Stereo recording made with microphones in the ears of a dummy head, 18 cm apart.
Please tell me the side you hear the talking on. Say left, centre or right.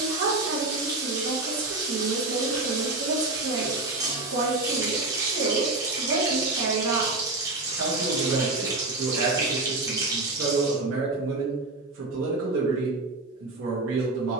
right.